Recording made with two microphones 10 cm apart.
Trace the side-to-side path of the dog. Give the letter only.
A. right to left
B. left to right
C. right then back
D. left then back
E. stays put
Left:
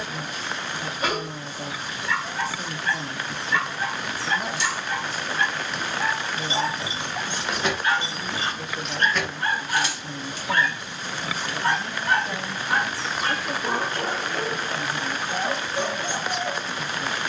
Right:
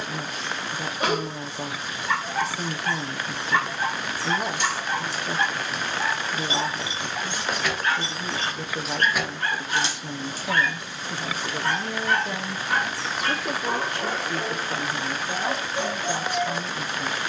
A.